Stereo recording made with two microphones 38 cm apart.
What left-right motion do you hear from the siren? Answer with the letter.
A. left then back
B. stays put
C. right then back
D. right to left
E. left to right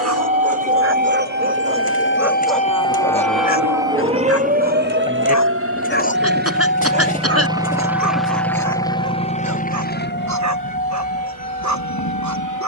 E.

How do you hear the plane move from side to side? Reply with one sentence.
You can hear the plane travel towards the left.